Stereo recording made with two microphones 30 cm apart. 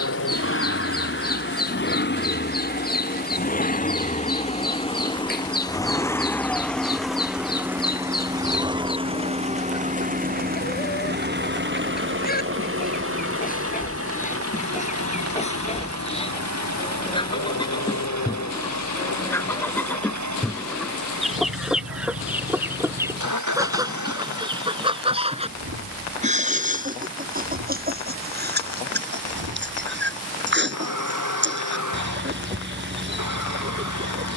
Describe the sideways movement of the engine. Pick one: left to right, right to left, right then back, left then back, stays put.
left to right.